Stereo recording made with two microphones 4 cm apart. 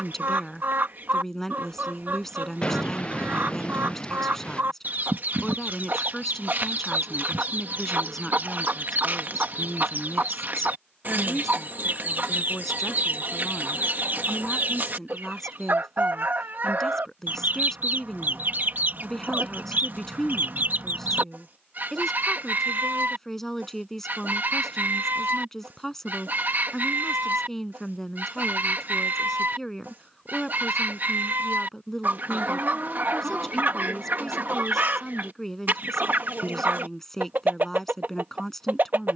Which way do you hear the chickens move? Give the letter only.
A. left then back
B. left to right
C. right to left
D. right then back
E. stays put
E.